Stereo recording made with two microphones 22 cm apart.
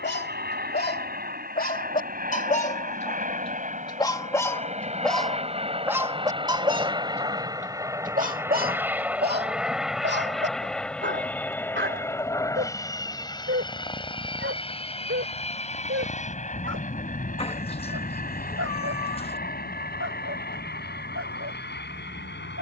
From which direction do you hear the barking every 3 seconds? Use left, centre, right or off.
left, centre, right, right, right, right, right, right.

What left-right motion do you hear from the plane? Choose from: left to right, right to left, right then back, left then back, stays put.
right to left.